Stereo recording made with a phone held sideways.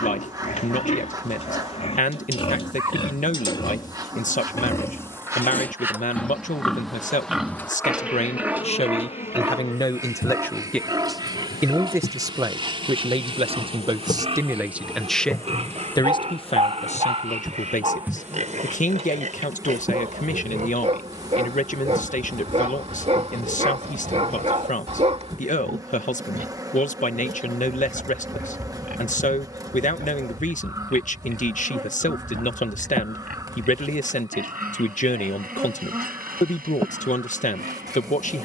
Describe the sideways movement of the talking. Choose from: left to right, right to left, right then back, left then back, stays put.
right then back.